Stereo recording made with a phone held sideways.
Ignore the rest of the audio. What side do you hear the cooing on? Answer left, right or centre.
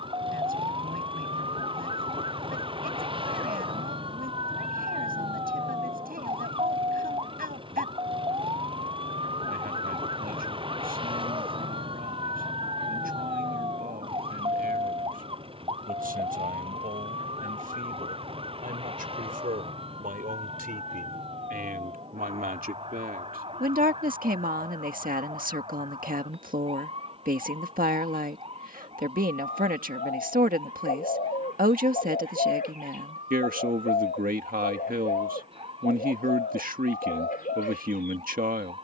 left.